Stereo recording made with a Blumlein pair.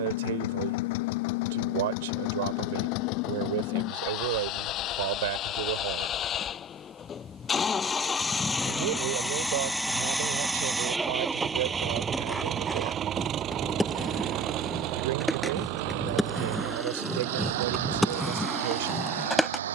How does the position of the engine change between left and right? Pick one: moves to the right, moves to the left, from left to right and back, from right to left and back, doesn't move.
moves to the right.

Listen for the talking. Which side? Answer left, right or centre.
right.